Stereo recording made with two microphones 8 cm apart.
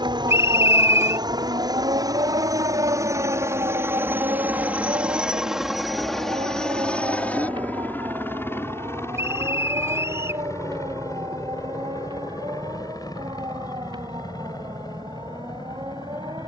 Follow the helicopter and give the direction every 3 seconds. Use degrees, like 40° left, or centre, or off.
50° right, 20° right, 20° left, 40° left, 50° left, 50° left.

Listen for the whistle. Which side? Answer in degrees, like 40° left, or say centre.
30° right.